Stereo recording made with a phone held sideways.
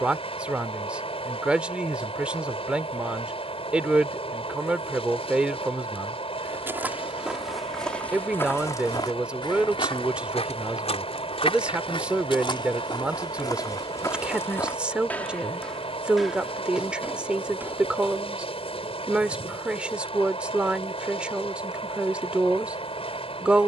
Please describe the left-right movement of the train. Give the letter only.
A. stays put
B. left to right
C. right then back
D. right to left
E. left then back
A.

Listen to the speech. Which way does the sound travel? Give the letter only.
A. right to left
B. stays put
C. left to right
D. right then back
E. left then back
B.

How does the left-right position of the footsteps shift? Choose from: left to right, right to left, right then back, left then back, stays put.
left then back.